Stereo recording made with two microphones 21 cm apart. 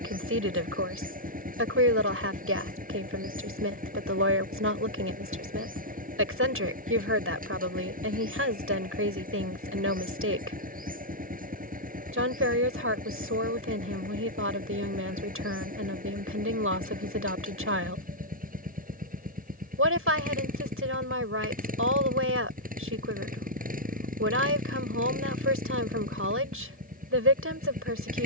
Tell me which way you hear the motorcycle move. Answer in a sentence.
You can hear the motorcycle stay in one place.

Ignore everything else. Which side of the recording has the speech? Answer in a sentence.
You can hear the speech on the right.